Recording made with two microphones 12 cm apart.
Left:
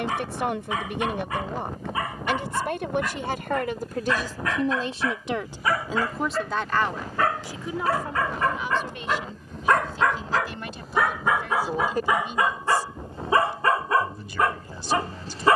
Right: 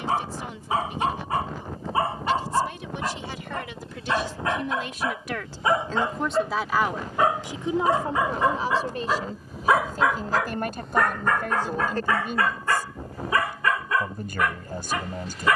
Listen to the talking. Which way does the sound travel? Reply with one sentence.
In this clip you hear the talking travel towards the right.